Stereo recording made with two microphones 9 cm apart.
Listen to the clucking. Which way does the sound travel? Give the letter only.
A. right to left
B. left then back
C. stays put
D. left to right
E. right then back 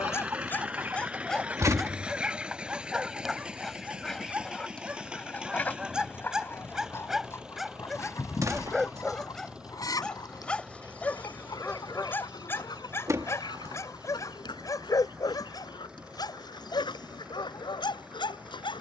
A.